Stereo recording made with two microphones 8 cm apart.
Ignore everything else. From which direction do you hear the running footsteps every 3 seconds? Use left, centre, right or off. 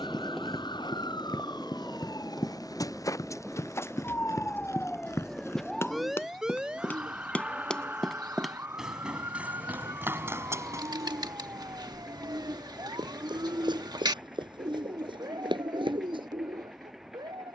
left, left, centre, right, right, right.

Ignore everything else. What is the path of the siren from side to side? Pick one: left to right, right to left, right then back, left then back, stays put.
left to right.